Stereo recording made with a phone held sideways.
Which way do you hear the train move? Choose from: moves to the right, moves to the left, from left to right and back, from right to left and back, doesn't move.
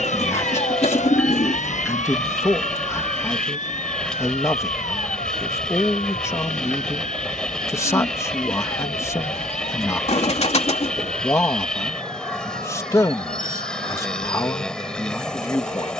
doesn't move.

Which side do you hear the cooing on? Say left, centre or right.
left.